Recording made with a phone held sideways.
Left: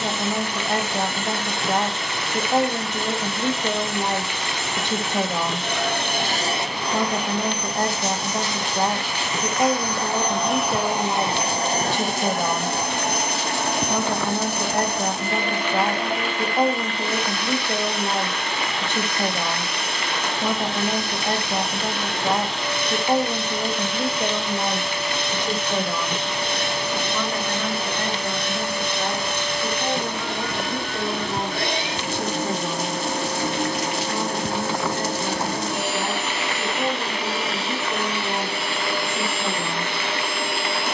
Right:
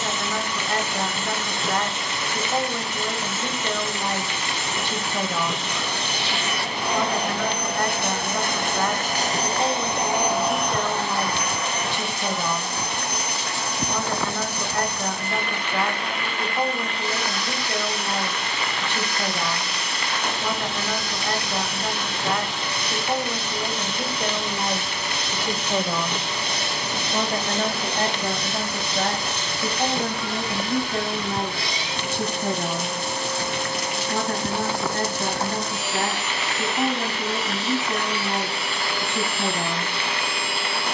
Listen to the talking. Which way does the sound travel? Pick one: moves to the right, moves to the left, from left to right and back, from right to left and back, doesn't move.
moves to the right.